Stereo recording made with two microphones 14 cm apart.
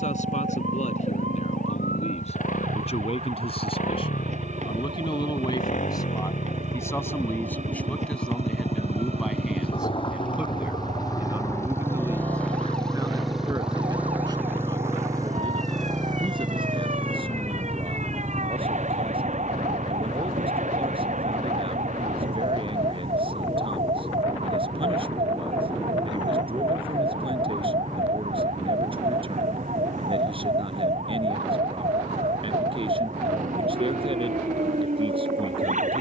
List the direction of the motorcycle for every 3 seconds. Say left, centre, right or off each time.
left, left, left, left, centre, right, right, right, right, right, right, right.